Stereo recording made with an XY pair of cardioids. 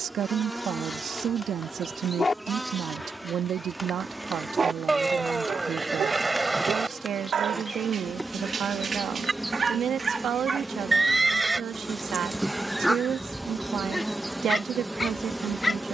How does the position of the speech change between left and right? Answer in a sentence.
You can hear the speech stay put.